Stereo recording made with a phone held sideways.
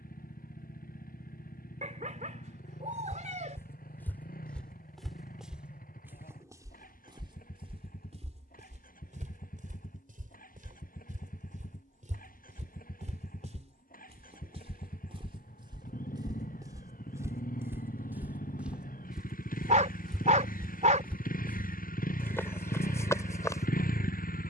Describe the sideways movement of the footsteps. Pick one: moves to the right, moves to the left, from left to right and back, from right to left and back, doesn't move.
from left to right and back.